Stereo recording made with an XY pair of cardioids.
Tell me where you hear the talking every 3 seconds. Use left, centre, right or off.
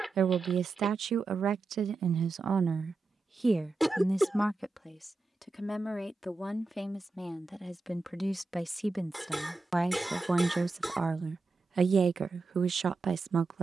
right, centre, centre, right, right.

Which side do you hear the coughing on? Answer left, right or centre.
centre.